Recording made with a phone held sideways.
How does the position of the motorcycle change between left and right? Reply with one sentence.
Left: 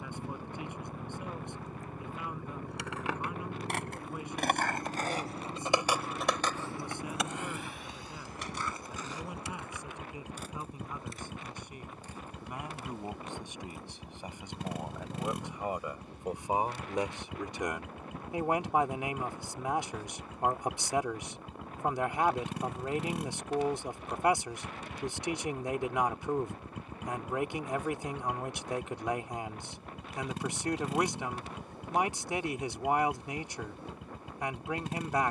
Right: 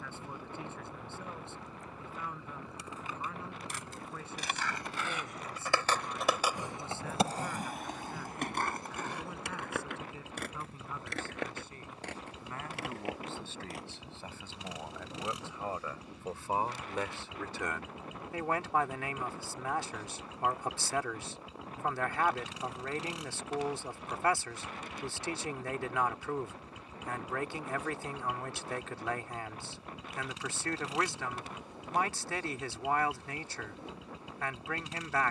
In this clip you hear the motorcycle stay in one place.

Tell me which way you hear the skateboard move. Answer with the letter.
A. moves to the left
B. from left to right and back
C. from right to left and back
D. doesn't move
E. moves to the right
E.